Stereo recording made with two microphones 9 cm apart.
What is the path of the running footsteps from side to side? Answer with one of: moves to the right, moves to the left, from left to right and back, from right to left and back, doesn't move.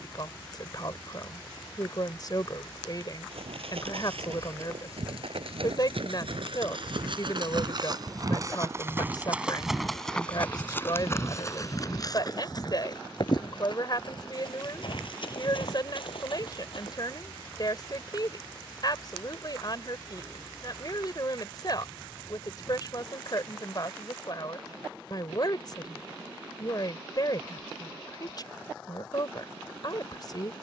moves to the left.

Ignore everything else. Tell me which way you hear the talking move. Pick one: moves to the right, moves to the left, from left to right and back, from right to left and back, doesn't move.
doesn't move.